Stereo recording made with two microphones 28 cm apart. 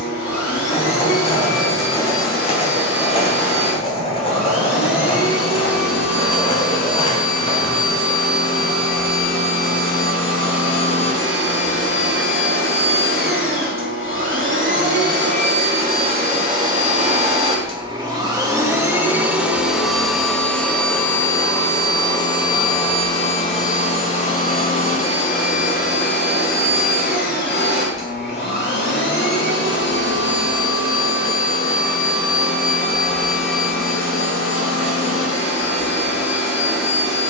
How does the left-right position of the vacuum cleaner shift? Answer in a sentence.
You can hear the vacuum cleaner go from the right side to the left.